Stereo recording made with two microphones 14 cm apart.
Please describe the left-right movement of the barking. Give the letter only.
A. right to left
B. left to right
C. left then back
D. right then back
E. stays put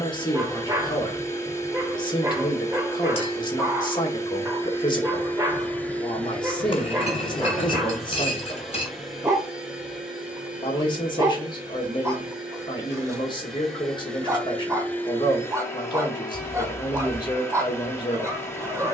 E.